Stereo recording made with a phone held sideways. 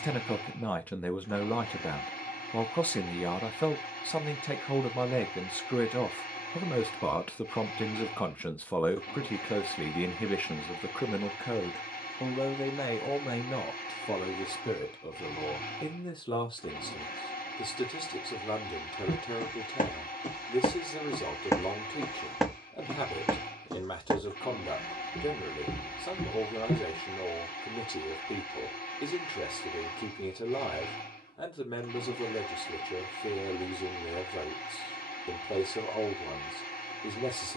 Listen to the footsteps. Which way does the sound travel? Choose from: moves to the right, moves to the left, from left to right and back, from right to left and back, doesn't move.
from left to right and back.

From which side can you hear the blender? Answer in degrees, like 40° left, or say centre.
70° left.